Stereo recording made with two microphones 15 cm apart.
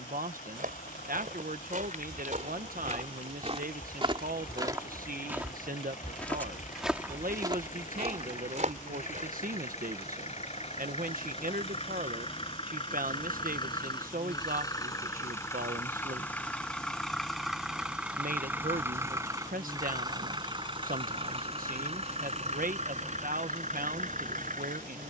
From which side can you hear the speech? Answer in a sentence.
You can hear the speech on the right.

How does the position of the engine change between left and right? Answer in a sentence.
In this clip you hear the engine go from the left side to the right.